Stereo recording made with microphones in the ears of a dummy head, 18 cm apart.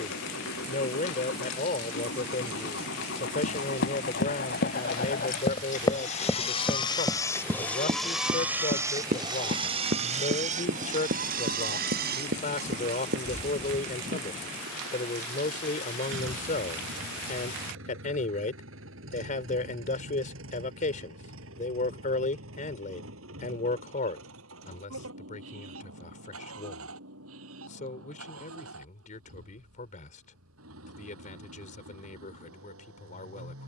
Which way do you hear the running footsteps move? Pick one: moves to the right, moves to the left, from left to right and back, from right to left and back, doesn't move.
moves to the right.